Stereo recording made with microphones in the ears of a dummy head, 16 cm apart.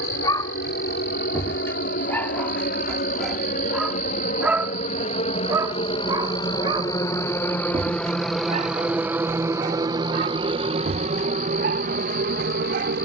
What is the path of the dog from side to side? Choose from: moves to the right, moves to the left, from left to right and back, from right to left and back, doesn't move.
moves to the right.